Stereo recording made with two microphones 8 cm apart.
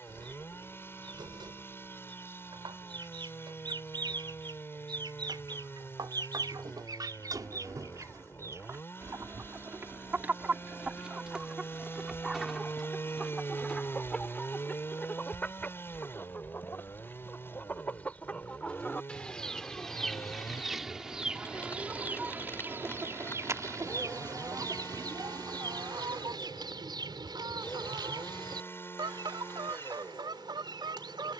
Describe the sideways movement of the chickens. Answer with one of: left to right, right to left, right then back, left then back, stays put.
left then back.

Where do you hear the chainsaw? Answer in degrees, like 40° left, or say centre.
30° left.